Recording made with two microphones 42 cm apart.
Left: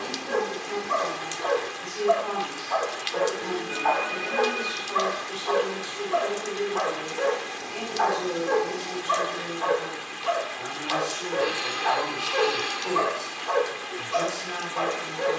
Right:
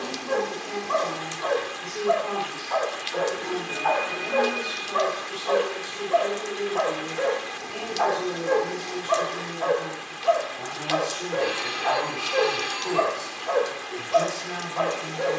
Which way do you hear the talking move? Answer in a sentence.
In this clip you hear the talking stay in one place.